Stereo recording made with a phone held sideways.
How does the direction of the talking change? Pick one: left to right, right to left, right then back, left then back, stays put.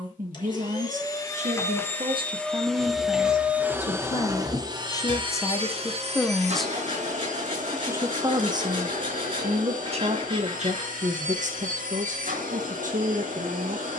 left then back.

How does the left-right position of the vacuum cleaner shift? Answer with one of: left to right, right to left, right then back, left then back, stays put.
left to right.